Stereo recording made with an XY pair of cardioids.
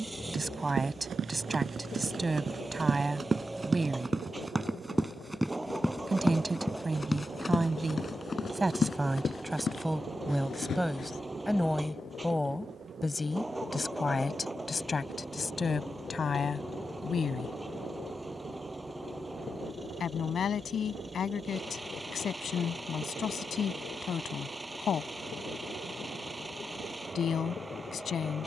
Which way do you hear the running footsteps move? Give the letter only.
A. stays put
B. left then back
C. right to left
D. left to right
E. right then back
C.